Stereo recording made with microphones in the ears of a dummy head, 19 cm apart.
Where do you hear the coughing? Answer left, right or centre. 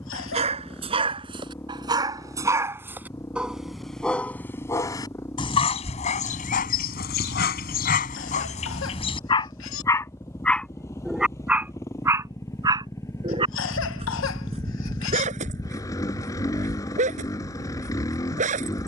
left.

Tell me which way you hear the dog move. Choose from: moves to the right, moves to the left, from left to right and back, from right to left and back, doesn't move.
from right to left and back.